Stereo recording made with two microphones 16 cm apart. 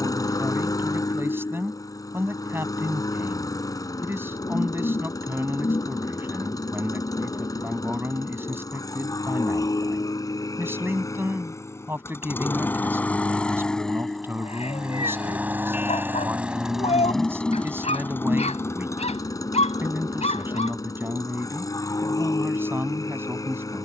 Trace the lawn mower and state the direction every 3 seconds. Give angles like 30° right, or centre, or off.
20° left, 20° left, 20° left, 20° left, 10° left, centre, 20° left, 20° left.